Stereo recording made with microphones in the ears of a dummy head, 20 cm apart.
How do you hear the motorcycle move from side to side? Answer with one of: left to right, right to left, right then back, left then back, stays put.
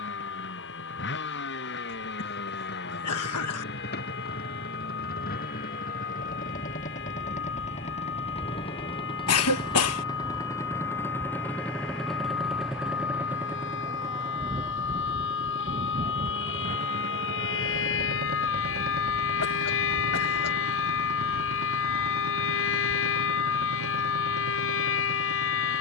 left to right.